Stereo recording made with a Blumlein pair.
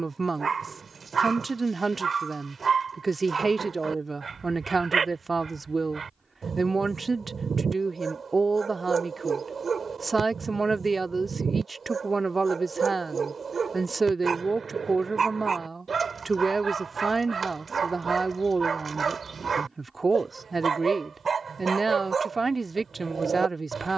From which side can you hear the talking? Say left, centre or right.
centre.